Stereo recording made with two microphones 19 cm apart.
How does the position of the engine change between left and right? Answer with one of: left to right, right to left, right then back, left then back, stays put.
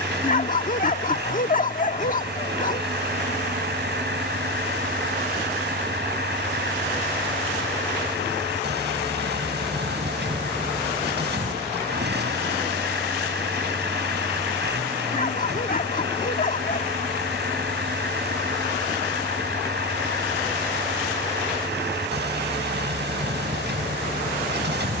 stays put.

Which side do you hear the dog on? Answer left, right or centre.
left.